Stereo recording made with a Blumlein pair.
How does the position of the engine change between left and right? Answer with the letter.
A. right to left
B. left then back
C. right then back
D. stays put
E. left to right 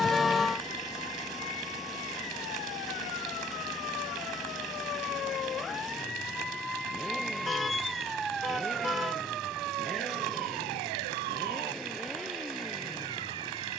D.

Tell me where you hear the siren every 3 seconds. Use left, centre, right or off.
left, left, centre, right, right.